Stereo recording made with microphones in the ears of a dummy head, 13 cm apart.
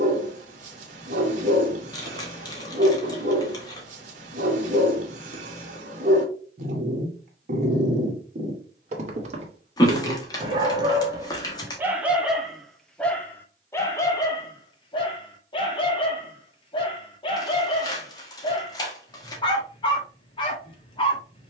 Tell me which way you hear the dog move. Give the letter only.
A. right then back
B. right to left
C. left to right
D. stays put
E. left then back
B.